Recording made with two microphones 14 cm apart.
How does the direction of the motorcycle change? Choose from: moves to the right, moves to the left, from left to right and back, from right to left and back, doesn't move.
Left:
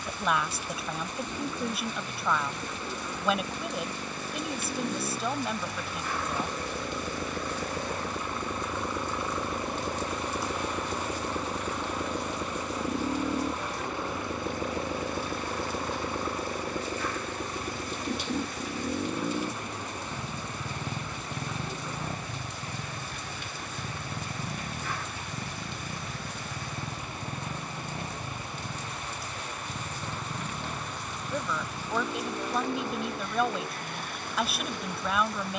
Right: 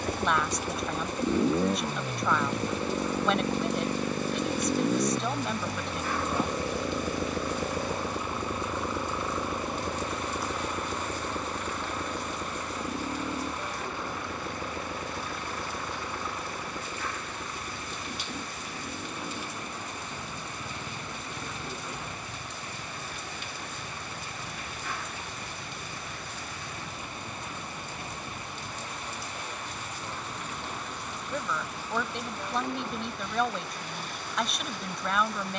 moves to the left.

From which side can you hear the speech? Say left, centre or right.
centre.